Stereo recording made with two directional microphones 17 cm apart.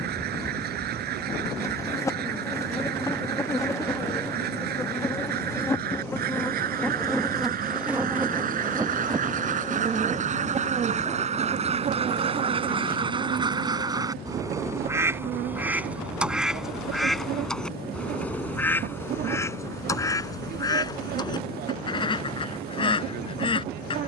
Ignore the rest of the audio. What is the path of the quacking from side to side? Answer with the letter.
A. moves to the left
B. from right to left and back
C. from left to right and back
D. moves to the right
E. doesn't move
A.